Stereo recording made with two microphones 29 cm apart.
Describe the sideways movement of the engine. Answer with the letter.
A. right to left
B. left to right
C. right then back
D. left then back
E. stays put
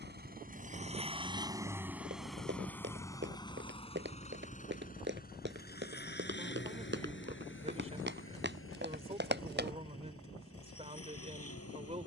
A.